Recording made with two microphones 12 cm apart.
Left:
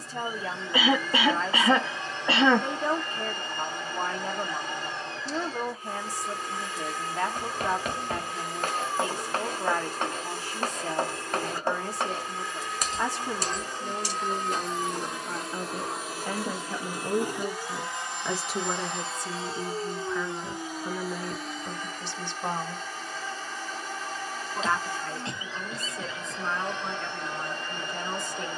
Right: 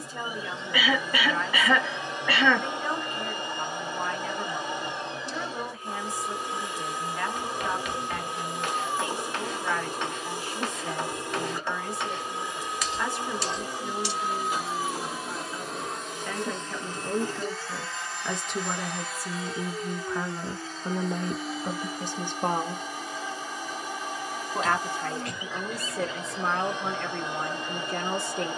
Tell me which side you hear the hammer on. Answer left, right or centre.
left.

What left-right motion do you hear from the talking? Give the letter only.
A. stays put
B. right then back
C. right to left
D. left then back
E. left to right
E.